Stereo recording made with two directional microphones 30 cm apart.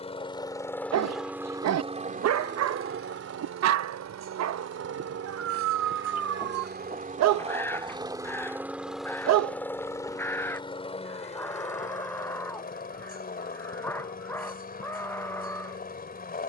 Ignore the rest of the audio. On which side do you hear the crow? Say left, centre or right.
centre.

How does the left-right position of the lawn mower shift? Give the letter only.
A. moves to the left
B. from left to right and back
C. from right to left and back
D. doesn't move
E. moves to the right
B.